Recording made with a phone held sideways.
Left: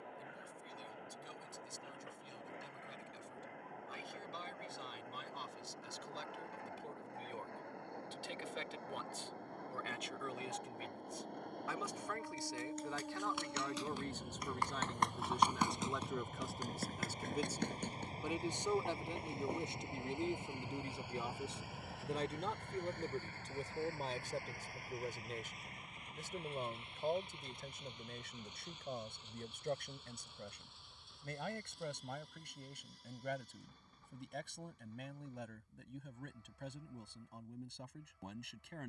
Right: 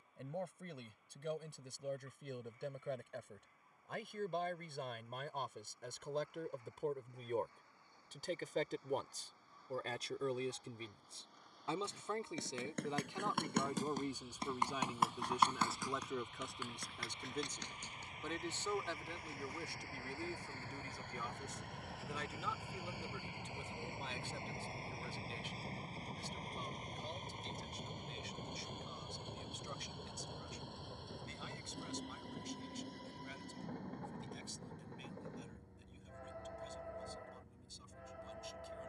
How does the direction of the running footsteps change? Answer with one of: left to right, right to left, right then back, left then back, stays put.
right to left.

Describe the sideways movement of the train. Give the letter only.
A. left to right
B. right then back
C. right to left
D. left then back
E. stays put
A.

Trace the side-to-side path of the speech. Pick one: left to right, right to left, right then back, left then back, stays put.
right to left.